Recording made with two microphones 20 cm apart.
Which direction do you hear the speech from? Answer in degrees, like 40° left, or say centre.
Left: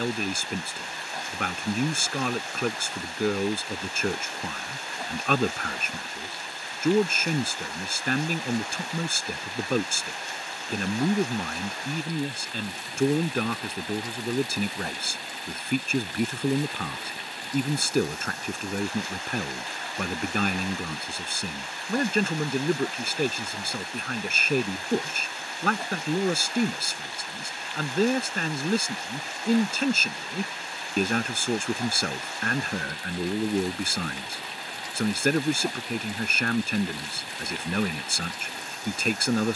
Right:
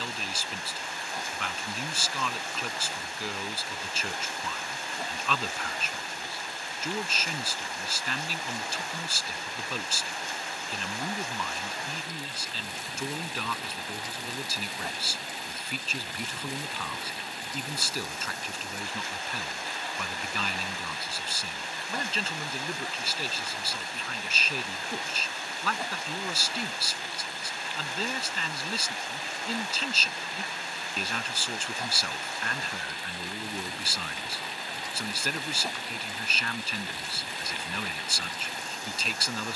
50° left.